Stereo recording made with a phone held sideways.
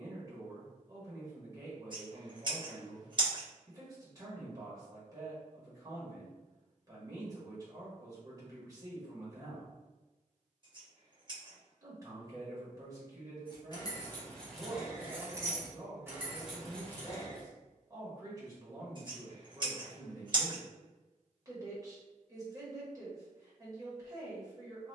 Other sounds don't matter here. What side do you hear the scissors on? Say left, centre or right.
right.